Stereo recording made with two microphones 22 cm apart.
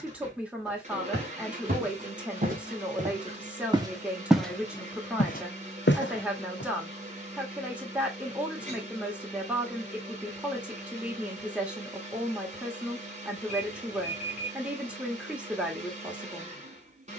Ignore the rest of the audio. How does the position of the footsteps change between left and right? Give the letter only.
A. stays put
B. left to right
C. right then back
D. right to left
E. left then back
D.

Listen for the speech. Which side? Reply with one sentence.
In this clip you hear the speech in the centre.